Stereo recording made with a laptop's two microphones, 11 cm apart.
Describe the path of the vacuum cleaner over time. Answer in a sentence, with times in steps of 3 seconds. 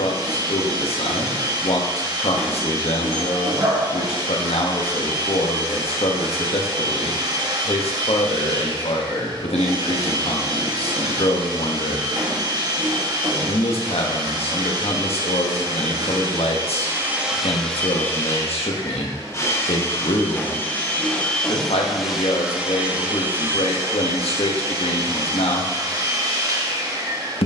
In this clip you hear the vacuum cleaner on the right from 0 s, on the left from 18 s, in the centre from 21 s and on the right from 24 s.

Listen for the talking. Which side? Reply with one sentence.
In this clip you hear the talking on the left.